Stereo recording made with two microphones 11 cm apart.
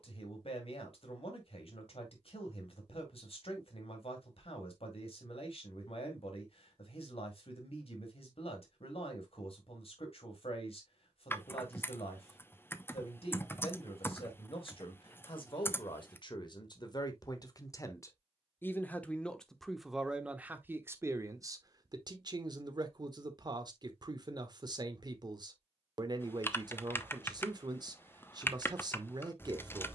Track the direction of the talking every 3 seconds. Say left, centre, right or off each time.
left, left, left, left, left, left, centre, right, right, right.